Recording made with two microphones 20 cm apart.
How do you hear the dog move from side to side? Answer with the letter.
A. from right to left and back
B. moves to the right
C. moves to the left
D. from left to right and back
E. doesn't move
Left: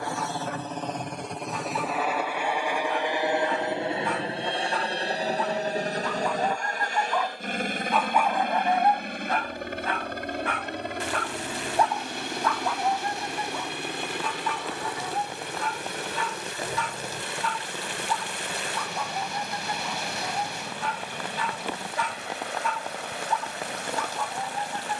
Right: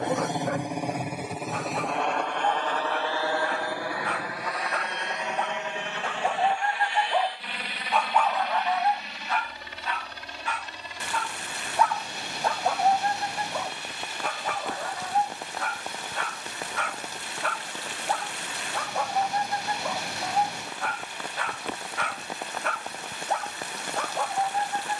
A.